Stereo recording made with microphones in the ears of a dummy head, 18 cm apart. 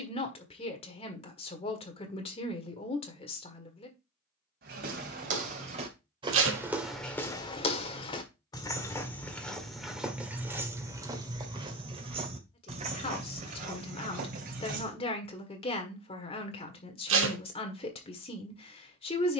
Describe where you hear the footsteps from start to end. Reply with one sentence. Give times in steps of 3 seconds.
In this clip you hear the footsteps not at all from 0 s, on the right from 3 s, in the centre from 6 s, on the right from 12 s and not at all from 15 s.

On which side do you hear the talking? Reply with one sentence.
You can hear the talking on the left.